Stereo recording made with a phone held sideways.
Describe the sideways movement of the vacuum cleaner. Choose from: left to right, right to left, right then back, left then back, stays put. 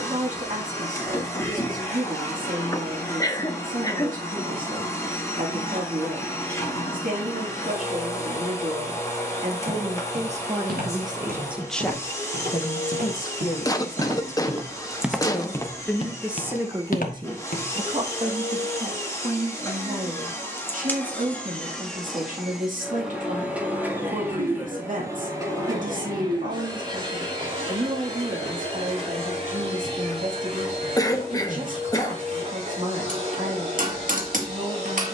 left to right.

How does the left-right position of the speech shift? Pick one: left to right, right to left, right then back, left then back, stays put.
left then back.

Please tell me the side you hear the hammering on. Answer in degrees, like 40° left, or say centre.
60° right.